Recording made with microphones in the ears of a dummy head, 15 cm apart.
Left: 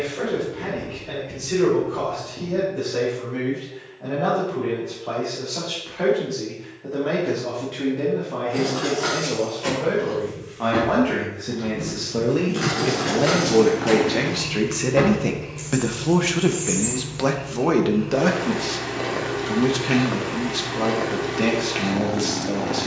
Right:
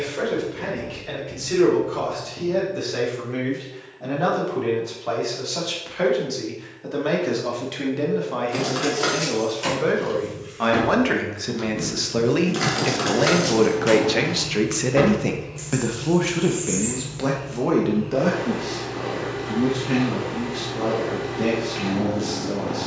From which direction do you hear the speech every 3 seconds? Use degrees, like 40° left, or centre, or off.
80° right, 80° right, 70° right, 60° right, 30° right, 20° left, 50° left, 60° left.